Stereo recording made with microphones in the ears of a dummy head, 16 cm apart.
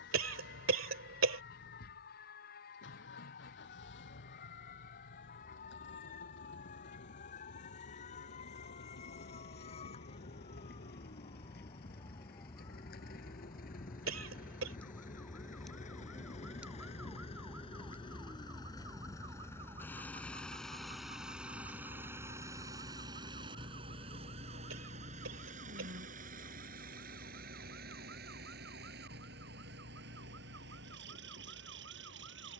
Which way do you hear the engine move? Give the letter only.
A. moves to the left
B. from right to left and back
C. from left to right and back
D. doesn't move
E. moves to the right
E.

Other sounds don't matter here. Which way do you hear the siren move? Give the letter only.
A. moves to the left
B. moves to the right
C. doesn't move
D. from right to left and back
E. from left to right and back
B.